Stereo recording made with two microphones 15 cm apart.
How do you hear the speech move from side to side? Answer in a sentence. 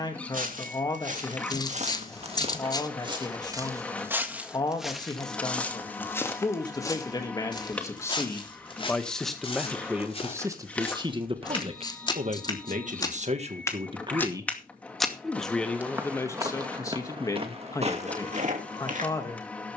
In this clip you hear the speech move from left to right and back again.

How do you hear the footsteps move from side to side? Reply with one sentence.
In this clip you hear the footsteps go left and come back.